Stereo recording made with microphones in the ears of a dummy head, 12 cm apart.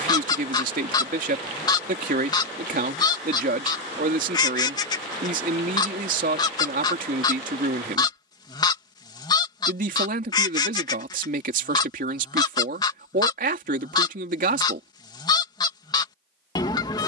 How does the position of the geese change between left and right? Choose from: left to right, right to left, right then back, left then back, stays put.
stays put.